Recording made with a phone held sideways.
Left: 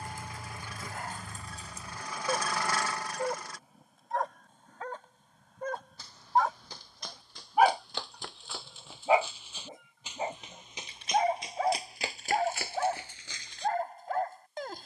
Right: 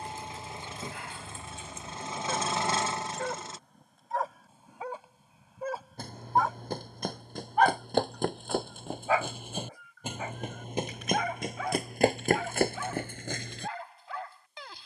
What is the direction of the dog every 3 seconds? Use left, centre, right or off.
left, centre, centre, left, left.